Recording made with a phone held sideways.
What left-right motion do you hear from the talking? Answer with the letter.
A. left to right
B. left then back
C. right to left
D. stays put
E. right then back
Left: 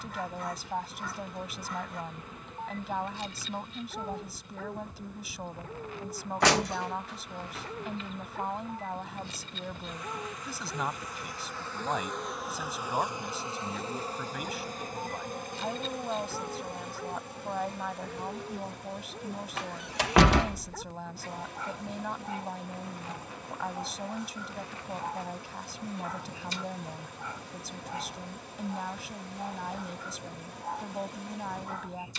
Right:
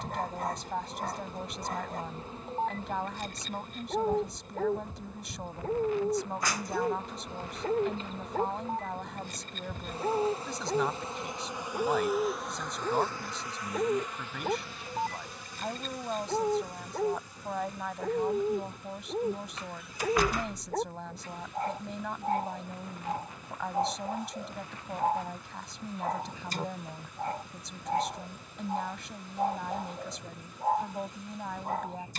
D.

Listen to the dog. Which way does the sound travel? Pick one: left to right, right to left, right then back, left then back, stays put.
stays put.